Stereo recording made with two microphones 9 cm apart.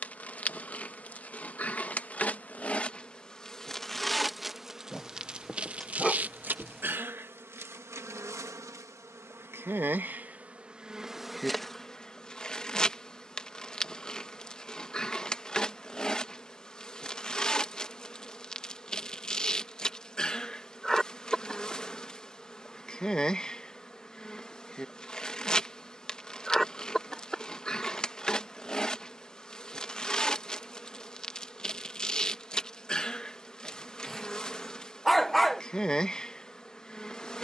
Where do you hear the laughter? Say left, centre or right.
centre.